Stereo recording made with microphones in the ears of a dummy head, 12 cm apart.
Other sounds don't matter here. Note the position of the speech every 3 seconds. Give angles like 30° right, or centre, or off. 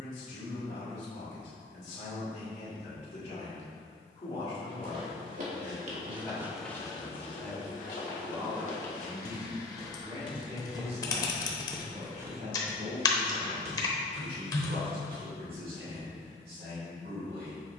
50° left, 30° left, 10° left, 30° right, 60° right, 70° right.